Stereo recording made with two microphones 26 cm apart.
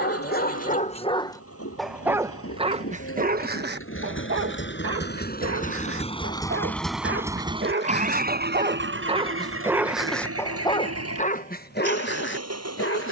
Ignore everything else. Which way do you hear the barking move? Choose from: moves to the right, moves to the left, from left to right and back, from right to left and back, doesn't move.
from left to right and back.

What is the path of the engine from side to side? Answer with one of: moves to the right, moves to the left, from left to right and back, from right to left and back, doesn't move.
moves to the right.